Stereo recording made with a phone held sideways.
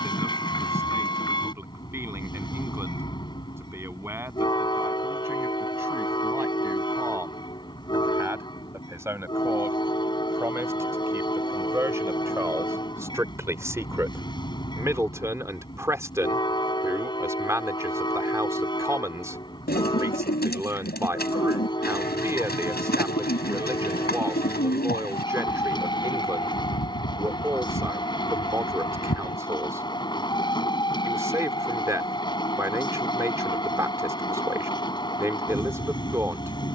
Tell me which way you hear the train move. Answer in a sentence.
In this clip you hear the train stay in one place.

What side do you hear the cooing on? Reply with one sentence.
You can hear the cooing on the left.